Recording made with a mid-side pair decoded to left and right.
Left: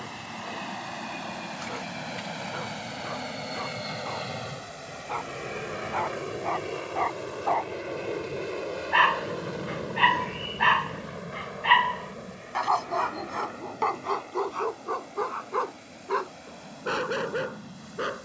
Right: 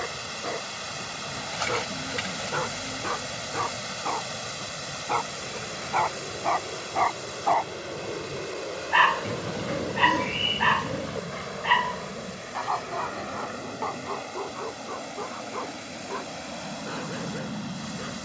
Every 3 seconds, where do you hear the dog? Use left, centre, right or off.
right, right, right, centre, left, left.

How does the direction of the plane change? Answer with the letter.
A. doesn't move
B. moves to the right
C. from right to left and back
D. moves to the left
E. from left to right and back
B.